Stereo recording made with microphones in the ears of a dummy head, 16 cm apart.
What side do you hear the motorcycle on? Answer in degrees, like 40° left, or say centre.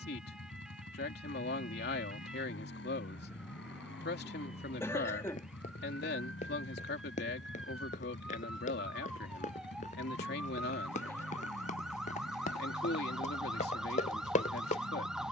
70° left.